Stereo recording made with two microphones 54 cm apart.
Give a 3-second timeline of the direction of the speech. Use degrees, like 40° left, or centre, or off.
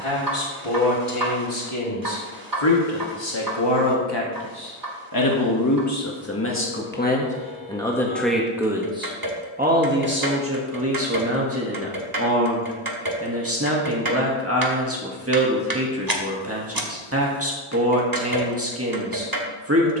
60° left, 40° left, 10° left, 20° right, 30° right, 30° right, 30° right.